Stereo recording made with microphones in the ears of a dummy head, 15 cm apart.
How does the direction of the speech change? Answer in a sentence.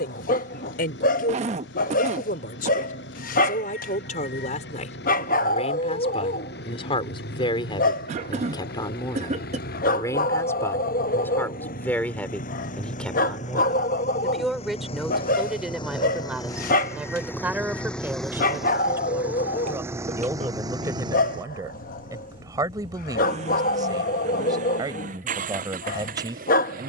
You can hear the speech travel towards the right.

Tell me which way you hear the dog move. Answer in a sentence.
You can hear the dog stay put.